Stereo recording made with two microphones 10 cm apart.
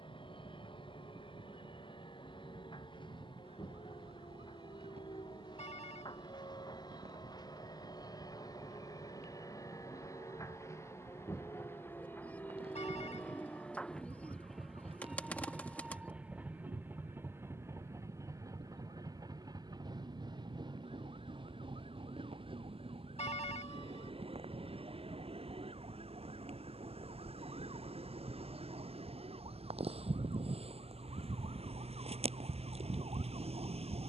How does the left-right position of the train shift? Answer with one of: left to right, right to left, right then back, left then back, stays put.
left to right.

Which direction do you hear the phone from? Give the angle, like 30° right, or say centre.
80° left.